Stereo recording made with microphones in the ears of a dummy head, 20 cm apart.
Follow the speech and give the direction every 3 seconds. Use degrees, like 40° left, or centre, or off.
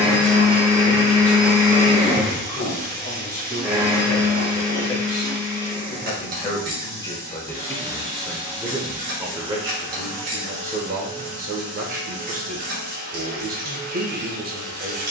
20° right, 40° left, 10° left, 30° right, 40° right.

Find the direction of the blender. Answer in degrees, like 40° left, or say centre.
10° right.